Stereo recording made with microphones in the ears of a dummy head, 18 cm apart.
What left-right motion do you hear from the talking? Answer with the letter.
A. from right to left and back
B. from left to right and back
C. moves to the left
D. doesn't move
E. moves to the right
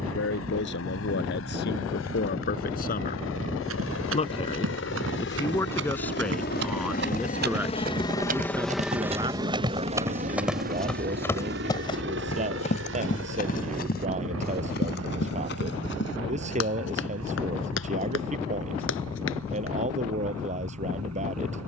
E.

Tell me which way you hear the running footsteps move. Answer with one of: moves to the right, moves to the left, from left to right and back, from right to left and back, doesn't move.
moves to the left.